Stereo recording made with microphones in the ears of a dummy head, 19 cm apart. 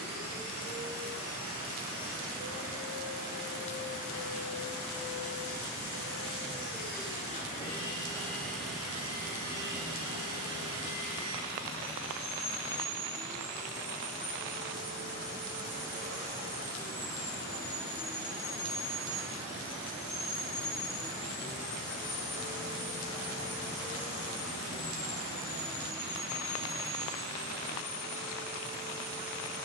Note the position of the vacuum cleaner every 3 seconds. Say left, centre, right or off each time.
left, left, left, right, right, right, centre, left, left, left.